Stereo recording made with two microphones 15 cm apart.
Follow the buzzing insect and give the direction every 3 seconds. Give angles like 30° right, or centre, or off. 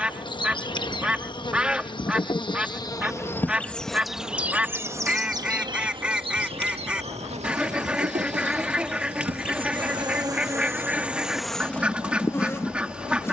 30° left, 10° right, 40° right, 20° right, 20° left.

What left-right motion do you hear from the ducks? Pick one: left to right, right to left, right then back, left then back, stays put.
stays put.